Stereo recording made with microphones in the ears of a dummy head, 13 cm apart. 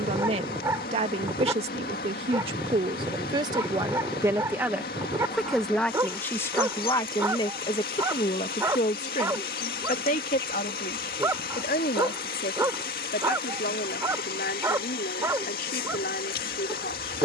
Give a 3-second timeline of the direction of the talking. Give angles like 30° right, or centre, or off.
40° right, 10° right, 30° left, 60° left, 70° left, 70° left.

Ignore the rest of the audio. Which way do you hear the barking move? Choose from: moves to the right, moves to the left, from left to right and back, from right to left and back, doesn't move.
doesn't move.